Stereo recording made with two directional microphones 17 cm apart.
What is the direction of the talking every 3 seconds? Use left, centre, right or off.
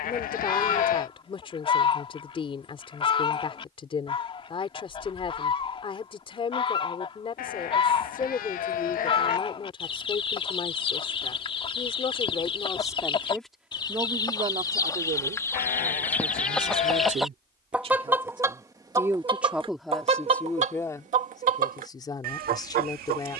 left, left, left, left, centre, right, centre, left.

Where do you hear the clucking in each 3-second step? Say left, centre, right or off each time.
left, left, left, left, left, centre, right, right.